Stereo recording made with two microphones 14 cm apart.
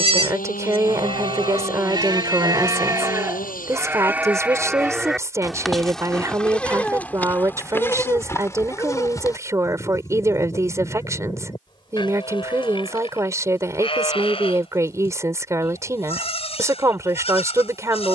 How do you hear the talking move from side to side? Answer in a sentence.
You can hear the talking stay in one place.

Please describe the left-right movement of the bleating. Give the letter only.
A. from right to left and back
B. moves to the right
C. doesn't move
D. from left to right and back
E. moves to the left
E.